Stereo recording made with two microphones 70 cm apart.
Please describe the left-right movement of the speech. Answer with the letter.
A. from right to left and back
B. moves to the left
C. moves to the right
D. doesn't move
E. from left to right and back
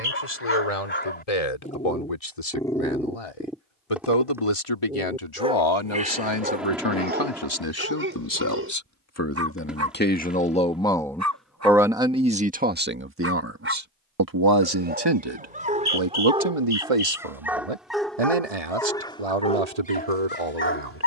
C.